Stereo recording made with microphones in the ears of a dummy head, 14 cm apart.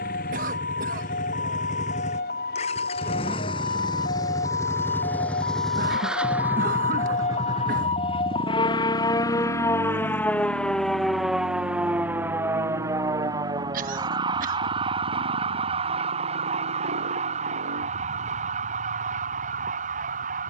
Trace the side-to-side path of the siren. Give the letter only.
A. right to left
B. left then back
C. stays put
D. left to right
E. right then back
D.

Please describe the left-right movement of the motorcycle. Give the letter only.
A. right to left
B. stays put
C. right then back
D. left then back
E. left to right
E.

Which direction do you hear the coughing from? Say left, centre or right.
right.